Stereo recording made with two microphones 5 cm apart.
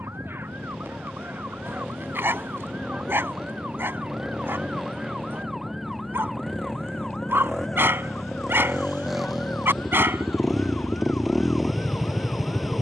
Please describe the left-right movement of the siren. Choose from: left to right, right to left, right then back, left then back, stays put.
right to left.